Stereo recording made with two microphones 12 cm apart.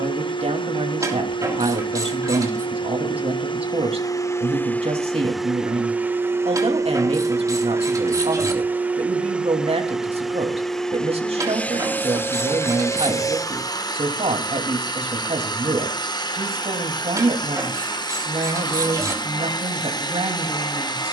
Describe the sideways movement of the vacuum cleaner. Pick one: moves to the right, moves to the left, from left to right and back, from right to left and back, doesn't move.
from left to right and back.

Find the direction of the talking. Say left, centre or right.
right.